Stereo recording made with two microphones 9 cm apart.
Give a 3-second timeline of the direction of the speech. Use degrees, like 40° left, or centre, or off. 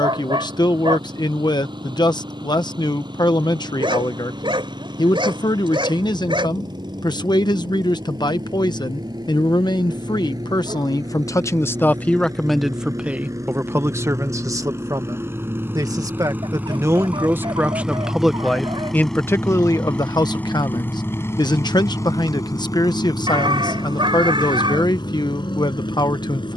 50° left, 50° left, 50° left, 50° left, 20° right, 30° right, 30° left, 50° left, 50° left.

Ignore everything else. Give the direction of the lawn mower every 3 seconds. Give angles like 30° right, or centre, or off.
60° right, 60° right, 50° right, 50° right, 40° right, 20° right, 10° left, 40° left, 60° left.